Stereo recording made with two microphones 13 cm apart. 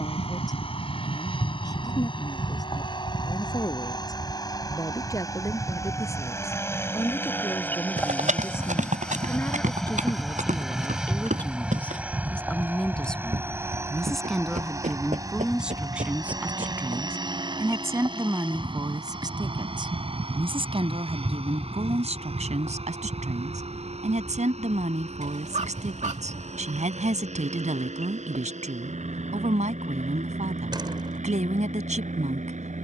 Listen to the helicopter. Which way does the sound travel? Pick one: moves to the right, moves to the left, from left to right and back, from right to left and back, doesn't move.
moves to the right.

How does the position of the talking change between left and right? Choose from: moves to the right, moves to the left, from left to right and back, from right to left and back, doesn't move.
moves to the right.